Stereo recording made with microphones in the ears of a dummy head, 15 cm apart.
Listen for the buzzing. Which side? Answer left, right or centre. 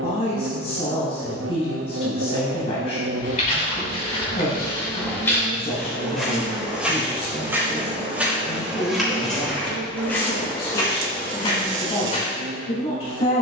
right.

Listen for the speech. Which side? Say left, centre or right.
left.